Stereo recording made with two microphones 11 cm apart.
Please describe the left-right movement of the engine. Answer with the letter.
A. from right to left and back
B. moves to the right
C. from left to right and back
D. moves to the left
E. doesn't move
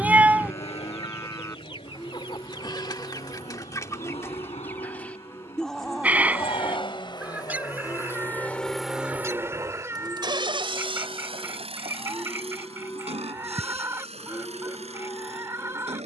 B.